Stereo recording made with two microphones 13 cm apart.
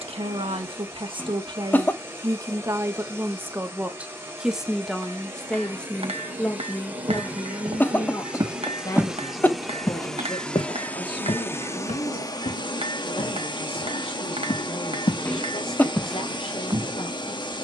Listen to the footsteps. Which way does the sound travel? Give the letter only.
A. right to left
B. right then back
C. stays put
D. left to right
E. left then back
E.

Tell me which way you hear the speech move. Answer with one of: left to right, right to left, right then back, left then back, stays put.
right to left.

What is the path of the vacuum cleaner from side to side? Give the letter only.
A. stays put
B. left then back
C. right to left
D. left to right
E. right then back
C.